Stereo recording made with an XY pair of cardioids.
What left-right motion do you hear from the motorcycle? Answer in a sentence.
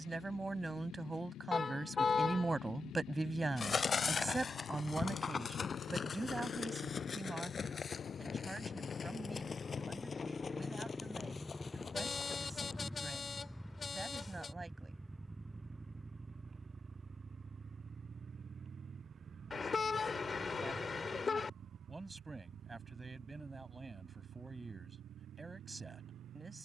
You can hear the motorcycle go from the left side to the right.